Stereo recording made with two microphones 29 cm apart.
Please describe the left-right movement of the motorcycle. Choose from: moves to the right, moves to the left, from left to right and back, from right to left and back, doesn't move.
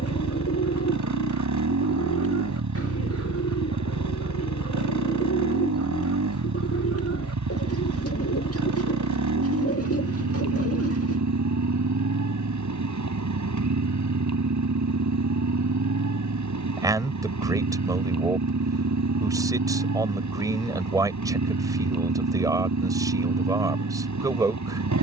doesn't move.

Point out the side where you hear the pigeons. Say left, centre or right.
left.